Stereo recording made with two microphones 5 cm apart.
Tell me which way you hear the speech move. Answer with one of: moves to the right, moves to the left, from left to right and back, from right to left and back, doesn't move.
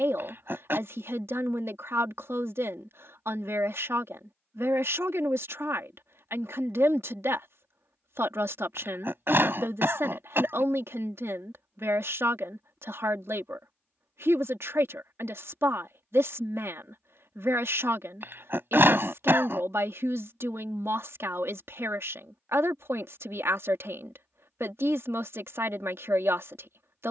doesn't move.